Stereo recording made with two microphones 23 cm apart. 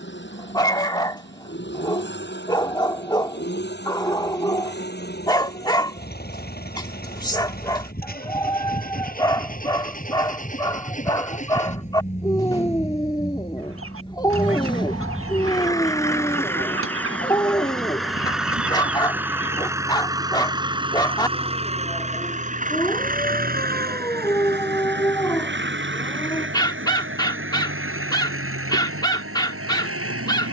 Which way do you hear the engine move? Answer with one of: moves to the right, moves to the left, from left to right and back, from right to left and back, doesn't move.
moves to the right.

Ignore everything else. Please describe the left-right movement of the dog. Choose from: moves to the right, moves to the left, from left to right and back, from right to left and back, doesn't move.
doesn't move.